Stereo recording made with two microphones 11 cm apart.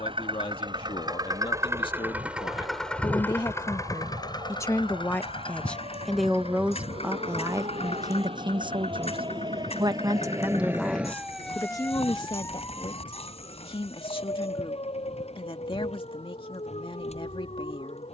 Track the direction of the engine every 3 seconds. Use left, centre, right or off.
right, left, left, left, left, left.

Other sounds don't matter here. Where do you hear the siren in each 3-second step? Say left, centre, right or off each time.
right, right, right, right, left, left.